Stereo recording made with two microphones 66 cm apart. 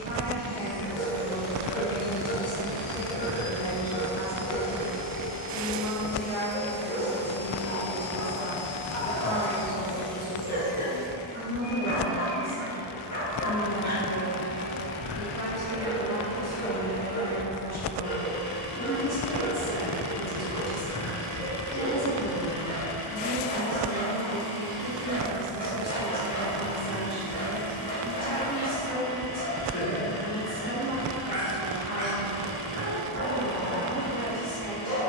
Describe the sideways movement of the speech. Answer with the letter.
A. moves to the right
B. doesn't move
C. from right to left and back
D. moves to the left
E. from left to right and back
B.